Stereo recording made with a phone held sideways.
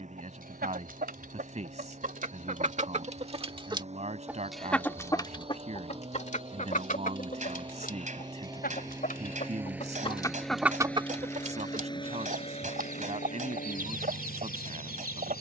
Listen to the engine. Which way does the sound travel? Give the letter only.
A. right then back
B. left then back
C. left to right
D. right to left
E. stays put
D.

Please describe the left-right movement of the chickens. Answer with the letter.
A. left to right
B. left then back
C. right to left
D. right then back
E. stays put
B.